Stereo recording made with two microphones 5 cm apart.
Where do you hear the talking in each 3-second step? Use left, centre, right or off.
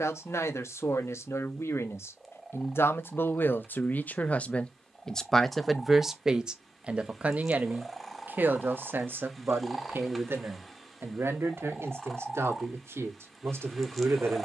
left, left, right, right, right.